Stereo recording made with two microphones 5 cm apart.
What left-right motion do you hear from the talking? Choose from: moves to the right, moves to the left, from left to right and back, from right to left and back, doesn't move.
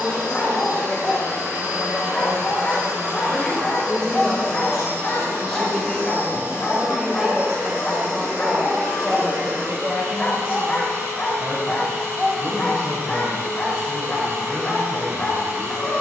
moves to the right.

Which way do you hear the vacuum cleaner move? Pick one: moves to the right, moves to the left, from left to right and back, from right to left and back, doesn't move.
doesn't move.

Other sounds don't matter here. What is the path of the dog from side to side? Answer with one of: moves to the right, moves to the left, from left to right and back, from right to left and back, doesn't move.
doesn't move.